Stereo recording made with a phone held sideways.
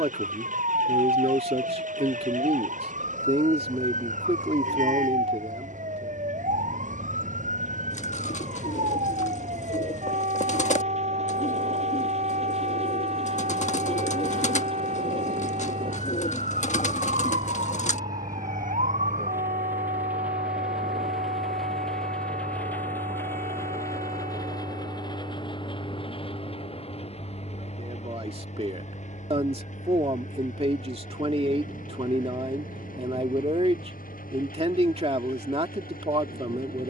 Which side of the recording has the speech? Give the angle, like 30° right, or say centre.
40° right.